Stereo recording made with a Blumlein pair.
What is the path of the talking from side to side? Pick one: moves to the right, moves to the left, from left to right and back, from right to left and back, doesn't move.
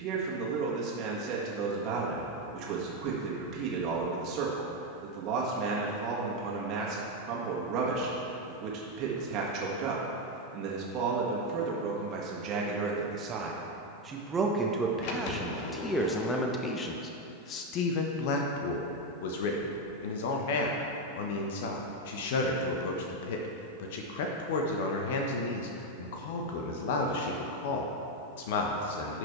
moves to the left.